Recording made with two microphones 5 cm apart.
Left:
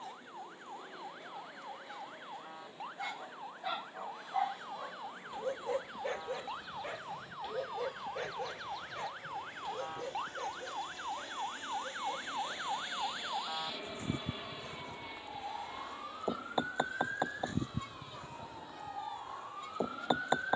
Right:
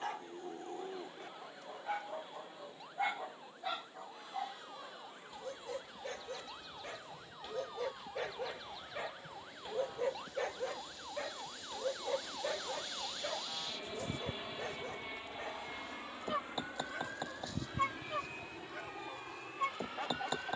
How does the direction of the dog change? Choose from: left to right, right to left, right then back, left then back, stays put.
left then back.